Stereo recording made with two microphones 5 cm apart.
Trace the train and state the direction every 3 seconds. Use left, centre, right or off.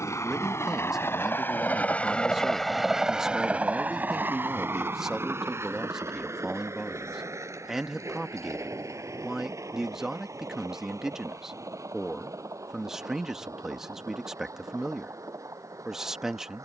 left, right, right, right, right, right.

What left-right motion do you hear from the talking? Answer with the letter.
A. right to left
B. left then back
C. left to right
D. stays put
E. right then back
D.